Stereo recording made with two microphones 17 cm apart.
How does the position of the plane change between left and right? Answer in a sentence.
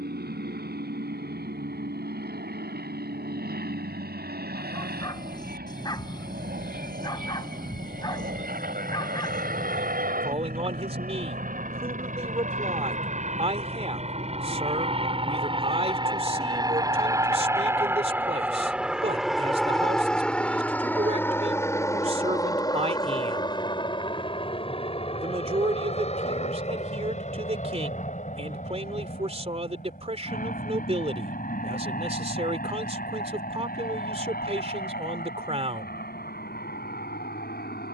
In this clip you hear the plane move to the left.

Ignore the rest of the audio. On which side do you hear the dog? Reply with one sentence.
In this clip you hear the dog on the left.